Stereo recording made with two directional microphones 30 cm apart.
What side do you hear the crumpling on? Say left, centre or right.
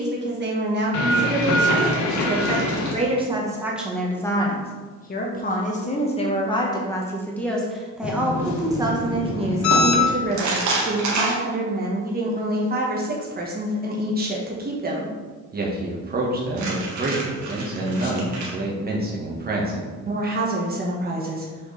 right.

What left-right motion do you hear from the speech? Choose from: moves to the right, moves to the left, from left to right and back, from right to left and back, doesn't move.
from right to left and back.